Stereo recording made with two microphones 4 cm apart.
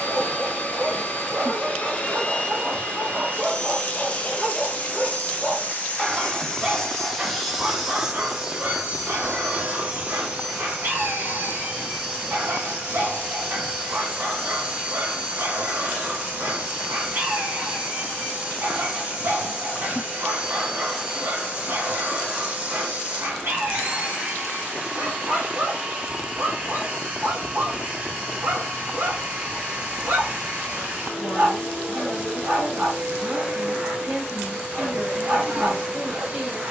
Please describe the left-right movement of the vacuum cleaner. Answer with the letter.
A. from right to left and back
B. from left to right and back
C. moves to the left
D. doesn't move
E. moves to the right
E.